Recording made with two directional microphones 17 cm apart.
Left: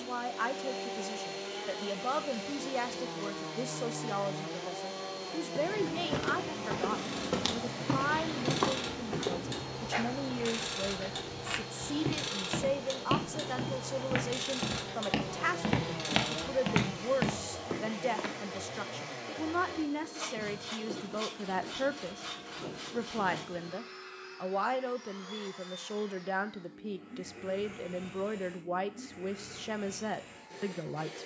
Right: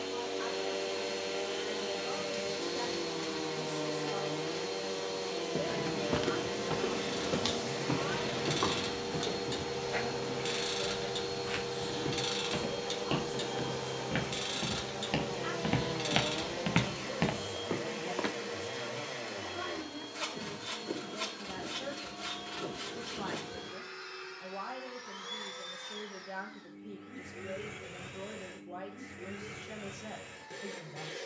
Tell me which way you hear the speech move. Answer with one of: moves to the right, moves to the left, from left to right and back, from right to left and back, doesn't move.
doesn't move.